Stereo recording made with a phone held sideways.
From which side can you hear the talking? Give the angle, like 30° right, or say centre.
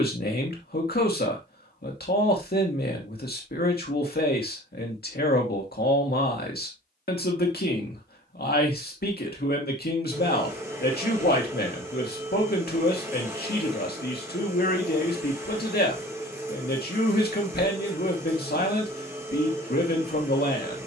70° left.